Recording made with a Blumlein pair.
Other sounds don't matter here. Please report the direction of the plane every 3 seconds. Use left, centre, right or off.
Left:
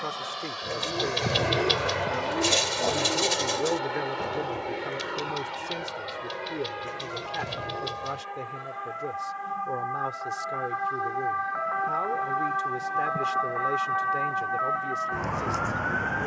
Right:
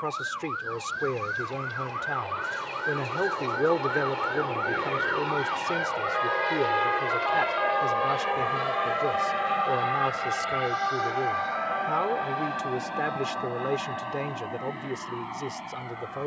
left, centre, right, right, right, right.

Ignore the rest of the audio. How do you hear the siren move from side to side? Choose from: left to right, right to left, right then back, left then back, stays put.
right to left.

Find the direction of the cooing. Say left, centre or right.
left.